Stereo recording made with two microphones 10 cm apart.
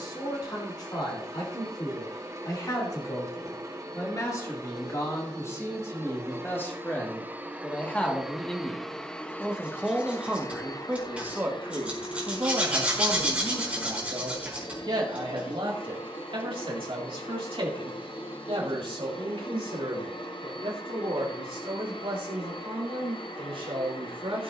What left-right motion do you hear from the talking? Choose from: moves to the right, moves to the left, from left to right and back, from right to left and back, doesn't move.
moves to the right.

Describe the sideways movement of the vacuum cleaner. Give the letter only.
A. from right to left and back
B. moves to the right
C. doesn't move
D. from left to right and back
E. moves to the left
E.